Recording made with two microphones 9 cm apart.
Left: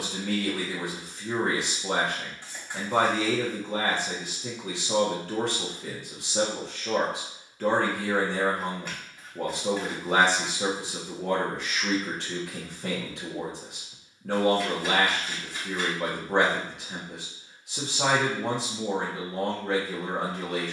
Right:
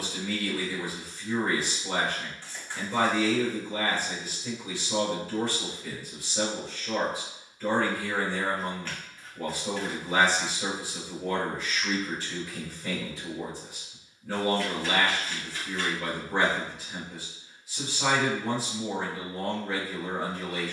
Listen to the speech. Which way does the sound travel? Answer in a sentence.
You can hear the speech stay put.